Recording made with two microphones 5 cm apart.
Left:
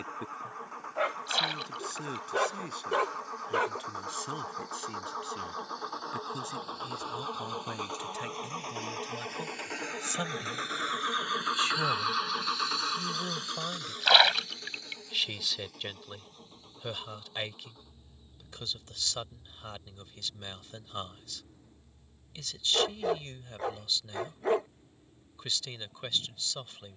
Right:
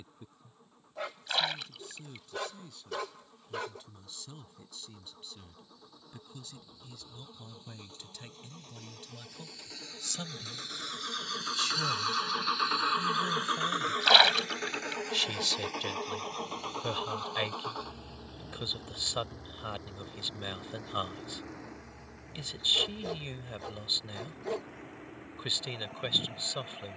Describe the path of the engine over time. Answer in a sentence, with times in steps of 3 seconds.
You can hear the engine on the left from 0 s and on the right from 12 s.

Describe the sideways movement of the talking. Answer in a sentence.
In this clip you hear the talking go from the left side to the right.